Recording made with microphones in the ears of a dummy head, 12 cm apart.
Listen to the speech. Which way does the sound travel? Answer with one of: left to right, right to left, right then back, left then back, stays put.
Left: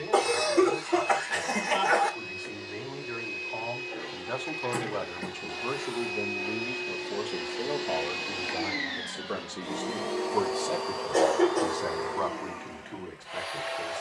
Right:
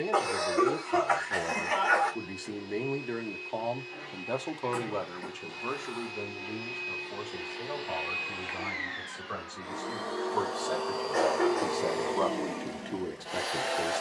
left then back.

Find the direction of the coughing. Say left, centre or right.
left.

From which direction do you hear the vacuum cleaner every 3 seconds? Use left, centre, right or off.
left, left, left, centre, right.